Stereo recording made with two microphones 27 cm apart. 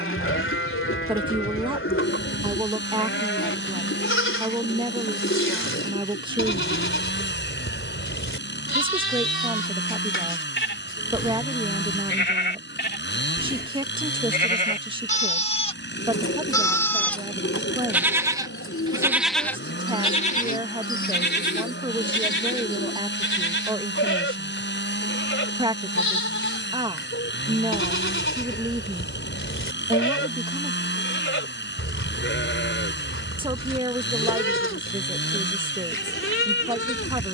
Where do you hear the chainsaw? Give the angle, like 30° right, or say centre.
40° left.